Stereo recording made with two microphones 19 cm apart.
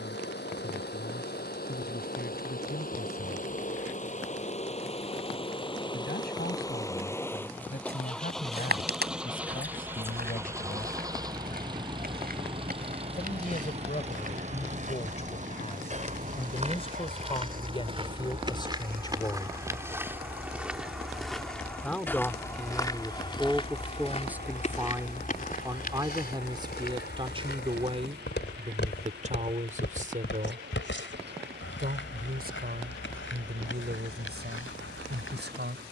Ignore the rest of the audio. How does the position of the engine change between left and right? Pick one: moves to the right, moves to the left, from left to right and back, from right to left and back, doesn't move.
moves to the right.